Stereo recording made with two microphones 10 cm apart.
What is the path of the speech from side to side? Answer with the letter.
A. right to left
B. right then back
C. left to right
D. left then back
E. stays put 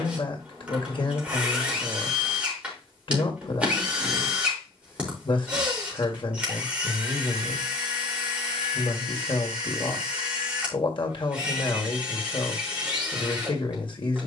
E.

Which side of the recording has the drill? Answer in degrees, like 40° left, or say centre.
10° right.